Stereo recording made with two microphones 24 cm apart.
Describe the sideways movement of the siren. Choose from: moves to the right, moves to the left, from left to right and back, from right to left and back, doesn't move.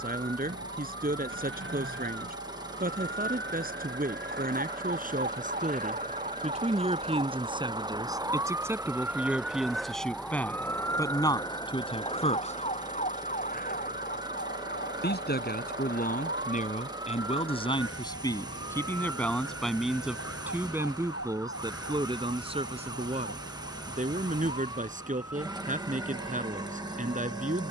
moves to the left.